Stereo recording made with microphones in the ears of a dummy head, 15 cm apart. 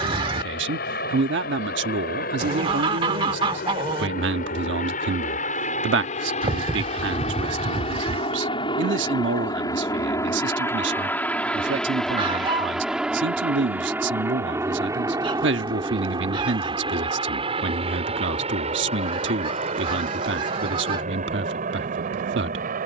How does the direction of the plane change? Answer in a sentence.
You can hear the plane move from left to right.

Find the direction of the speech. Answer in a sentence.
In this clip you hear the speech on the right.